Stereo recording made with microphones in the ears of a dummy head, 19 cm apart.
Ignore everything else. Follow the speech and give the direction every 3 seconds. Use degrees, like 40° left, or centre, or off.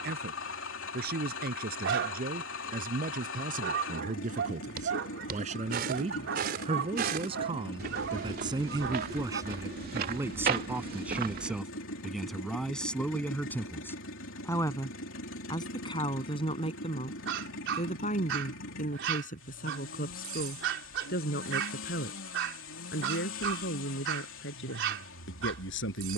50° right, 40° right, 20° right, 10° right, 10° left, 30° left, 40° left, 50° left, 60° left.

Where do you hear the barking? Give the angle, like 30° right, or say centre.
60° right.